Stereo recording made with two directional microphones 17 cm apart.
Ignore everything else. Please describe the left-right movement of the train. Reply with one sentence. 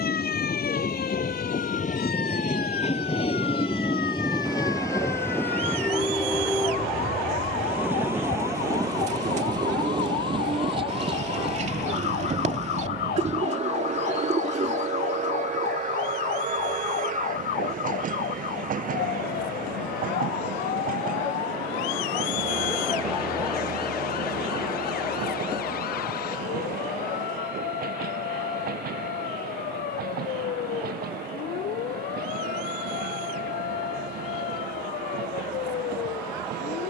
You can hear the train move to the right.